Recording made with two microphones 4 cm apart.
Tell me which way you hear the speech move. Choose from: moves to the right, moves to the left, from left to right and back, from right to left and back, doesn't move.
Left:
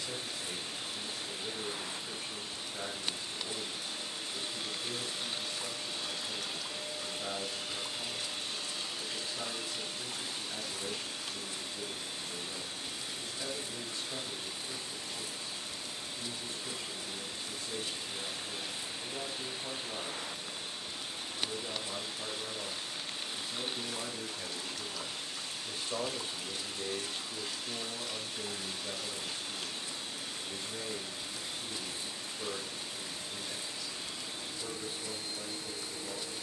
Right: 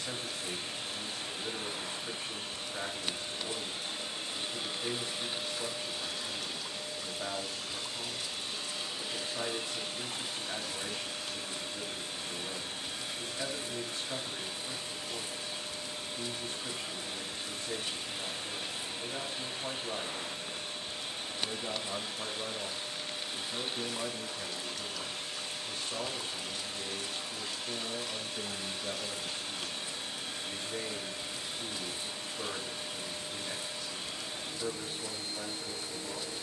from right to left and back.